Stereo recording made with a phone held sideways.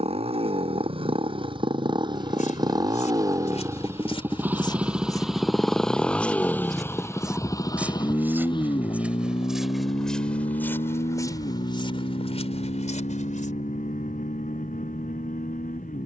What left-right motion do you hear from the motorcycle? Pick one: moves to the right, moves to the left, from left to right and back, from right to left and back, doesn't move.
moves to the left.